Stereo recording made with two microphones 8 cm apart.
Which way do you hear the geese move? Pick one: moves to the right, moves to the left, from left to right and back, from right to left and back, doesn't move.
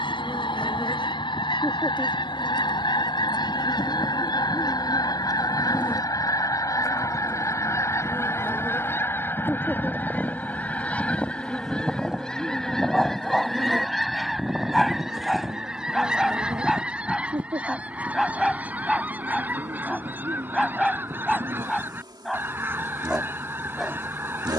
moves to the right.